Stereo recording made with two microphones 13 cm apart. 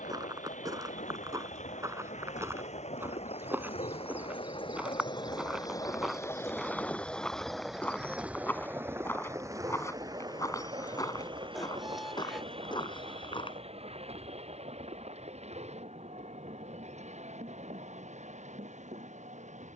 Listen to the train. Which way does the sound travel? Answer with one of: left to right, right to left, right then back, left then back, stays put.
left to right.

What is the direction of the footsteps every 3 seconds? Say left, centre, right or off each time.
right, centre, centre, left, left, off, off.